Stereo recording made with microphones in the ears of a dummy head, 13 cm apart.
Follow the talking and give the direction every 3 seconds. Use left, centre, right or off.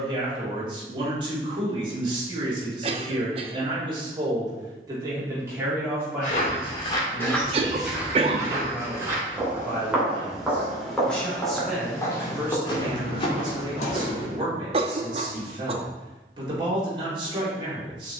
right, right, centre, centre, right, right.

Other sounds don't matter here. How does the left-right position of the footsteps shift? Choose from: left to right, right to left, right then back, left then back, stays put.
right then back.